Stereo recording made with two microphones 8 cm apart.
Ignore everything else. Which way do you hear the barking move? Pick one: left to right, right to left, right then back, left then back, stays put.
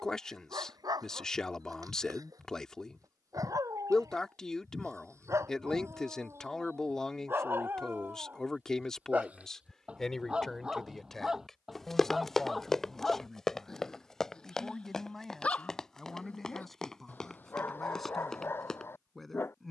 right to left.